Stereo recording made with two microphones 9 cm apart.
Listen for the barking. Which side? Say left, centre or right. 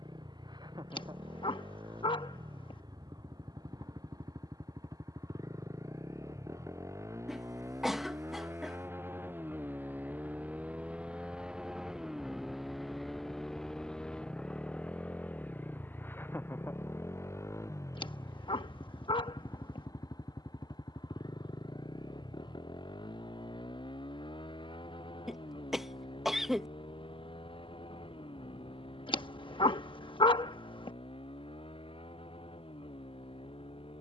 left.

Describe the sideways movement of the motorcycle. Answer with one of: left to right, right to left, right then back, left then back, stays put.
right to left.